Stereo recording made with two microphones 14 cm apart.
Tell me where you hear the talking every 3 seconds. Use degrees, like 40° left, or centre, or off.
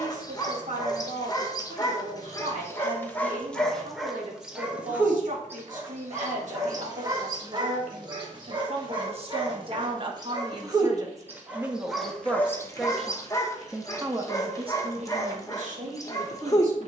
70° right, 70° right, 60° right, 30° right, 20° right, 60° right.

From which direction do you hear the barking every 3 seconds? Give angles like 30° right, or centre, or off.
30° left, centre, 30° right, 30° right, 20° left, 20° left.